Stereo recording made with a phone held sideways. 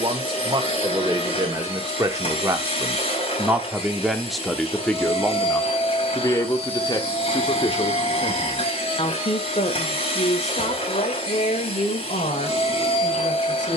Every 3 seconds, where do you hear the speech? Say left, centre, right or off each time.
right, centre, left, left, left.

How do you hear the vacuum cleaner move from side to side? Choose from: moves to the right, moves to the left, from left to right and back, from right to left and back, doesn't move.
doesn't move.